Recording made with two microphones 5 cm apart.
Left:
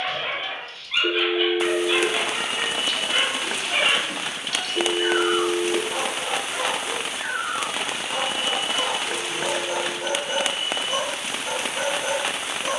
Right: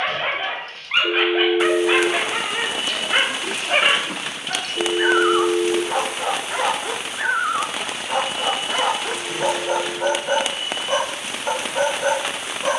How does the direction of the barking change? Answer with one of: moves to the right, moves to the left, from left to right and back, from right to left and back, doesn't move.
doesn't move.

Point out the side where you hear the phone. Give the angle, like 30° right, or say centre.
40° left.